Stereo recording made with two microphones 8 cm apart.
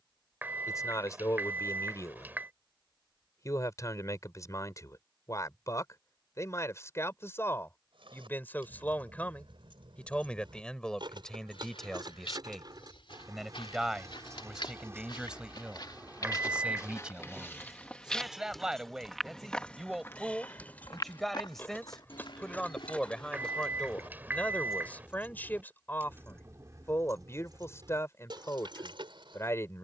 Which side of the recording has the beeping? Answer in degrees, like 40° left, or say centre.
20° right.